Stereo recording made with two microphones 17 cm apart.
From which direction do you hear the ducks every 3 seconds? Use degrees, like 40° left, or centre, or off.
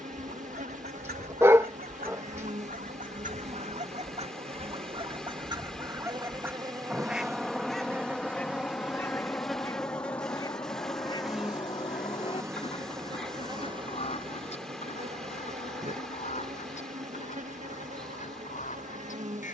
60° right, 40° right, centre, 20° left, 40° left, 40° left, 50° left.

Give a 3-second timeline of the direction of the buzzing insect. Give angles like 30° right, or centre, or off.
50° right, 40° right, 20° right, centre, 30° right, 50° right, 50° right.